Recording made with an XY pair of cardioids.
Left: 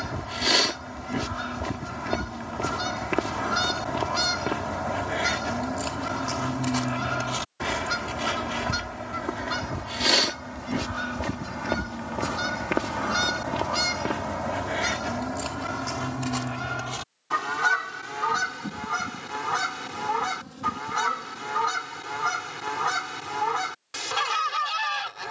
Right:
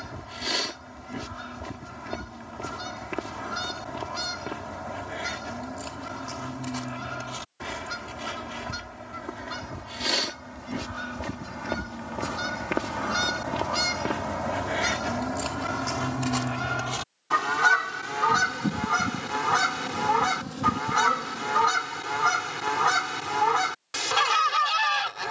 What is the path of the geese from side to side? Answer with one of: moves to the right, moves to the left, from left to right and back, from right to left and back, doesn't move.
moves to the right.